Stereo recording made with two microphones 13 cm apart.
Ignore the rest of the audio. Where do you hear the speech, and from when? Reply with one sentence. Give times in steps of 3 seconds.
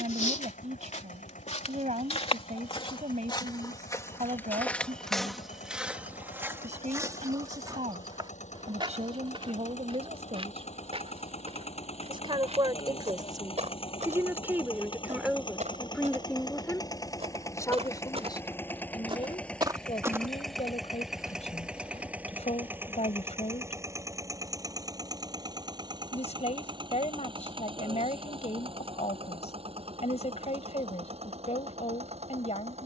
You can hear the speech on the right from 0 s, in the centre from 15 s and on the left from 18 s.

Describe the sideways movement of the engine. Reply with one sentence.
You can hear the engine travel towards the right.